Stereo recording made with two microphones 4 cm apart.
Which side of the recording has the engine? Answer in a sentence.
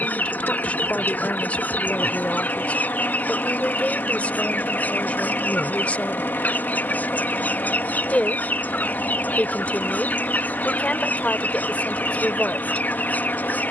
In this clip you hear the engine on the left.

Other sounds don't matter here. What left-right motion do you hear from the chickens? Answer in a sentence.
You can hear the chickens stay put.